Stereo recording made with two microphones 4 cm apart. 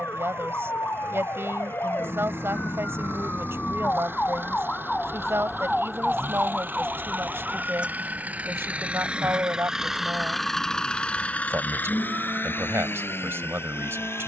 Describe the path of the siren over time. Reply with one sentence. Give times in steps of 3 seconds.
You can hear the siren on the left from 0 s and on the right from 6 s.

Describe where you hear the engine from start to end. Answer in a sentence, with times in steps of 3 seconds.
In this clip you hear the engine on the right from 0 s, in the centre from 9 s and on the left from 12 s.